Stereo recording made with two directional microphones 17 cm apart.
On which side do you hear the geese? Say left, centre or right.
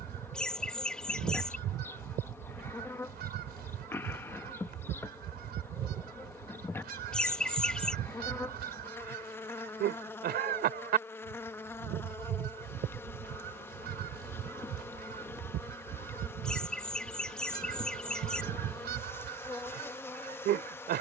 right.